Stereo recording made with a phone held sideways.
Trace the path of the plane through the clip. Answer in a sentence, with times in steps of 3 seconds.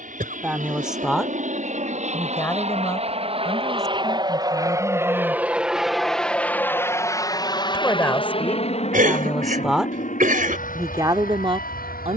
In this clip you hear the plane on the right from 0 s and on the left from 6 s.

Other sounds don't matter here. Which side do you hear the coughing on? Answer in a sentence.
You can hear the coughing on the right.